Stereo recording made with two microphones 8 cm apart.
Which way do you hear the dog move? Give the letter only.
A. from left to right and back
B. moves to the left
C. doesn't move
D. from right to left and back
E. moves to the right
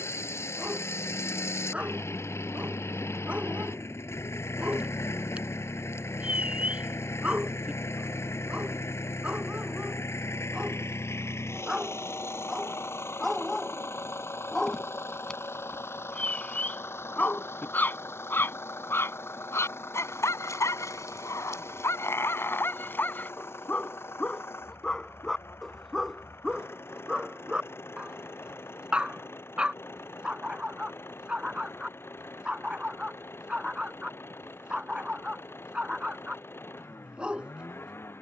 D.